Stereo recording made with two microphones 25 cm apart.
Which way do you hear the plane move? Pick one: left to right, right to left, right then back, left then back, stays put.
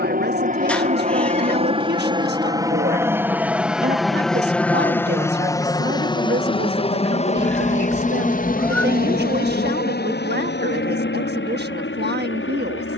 right to left.